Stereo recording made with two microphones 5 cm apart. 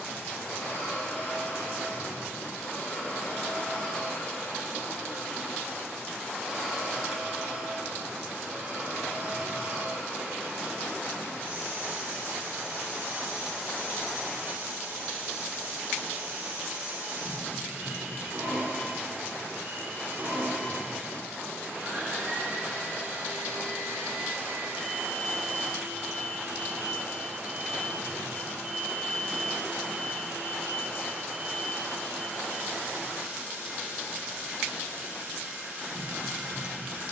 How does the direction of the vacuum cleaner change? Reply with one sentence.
In this clip you hear the vacuum cleaner go from the left side to the right.